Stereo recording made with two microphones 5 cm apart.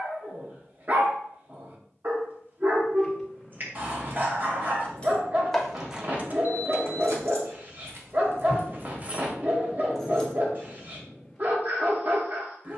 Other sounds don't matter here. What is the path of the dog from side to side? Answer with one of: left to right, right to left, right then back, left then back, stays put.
stays put.